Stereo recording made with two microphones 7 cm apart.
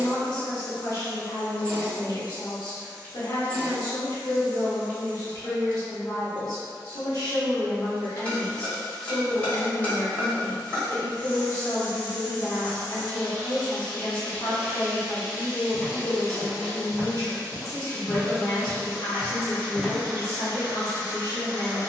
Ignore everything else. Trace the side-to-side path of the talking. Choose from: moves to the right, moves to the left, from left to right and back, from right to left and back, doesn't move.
doesn't move.